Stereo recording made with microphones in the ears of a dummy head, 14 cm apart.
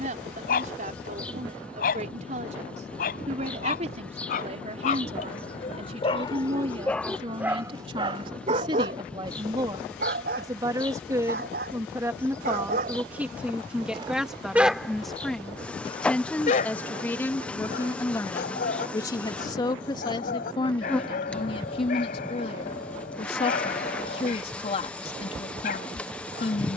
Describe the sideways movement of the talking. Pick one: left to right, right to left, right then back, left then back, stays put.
right to left.